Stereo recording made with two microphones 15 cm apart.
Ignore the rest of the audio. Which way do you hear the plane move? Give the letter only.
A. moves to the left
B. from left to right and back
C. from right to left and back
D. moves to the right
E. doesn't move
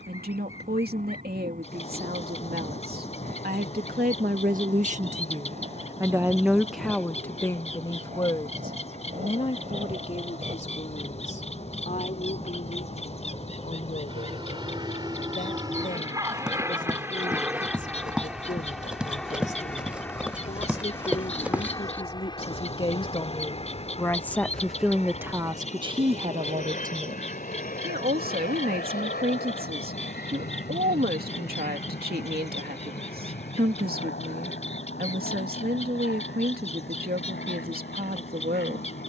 A.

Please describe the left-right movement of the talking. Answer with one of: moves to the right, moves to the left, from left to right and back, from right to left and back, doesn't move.
from right to left and back.